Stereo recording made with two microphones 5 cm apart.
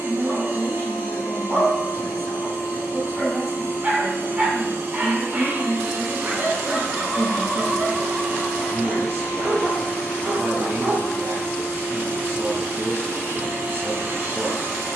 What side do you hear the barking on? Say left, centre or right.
right.